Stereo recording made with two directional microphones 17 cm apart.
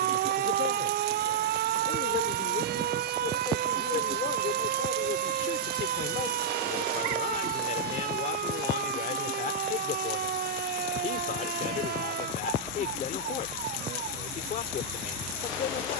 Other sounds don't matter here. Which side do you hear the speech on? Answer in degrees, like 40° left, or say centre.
50° left.